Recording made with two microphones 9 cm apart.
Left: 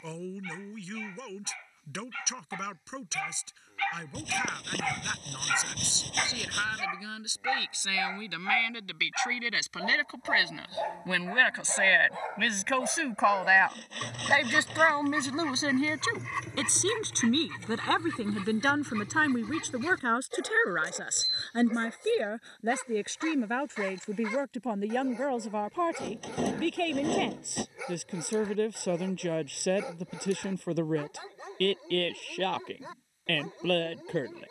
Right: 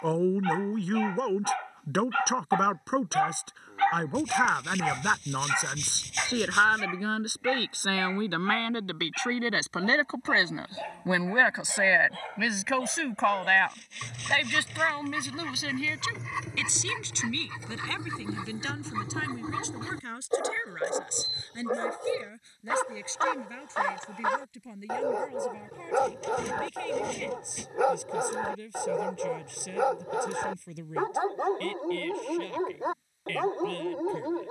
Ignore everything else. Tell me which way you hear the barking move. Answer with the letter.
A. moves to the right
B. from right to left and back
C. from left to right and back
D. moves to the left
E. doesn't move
B.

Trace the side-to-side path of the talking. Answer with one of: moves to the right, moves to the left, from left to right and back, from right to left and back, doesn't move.
moves to the left.